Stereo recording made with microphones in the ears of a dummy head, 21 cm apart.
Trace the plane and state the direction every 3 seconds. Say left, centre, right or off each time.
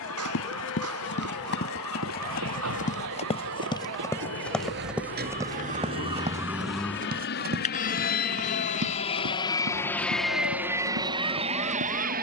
left, left, left, centre.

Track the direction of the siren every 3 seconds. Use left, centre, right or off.
right, right, left, left.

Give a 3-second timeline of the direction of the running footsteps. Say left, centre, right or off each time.
left, centre, right, right.